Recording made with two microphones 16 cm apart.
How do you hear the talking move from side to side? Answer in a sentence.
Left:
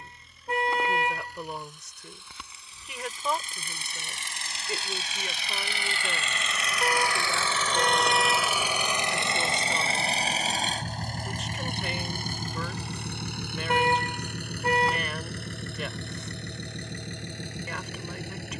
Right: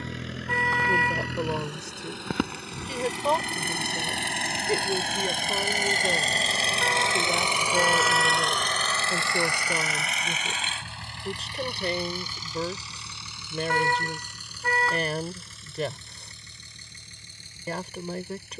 You can hear the talking stay in one place.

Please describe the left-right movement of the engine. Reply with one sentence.
You can hear the engine move from right to left.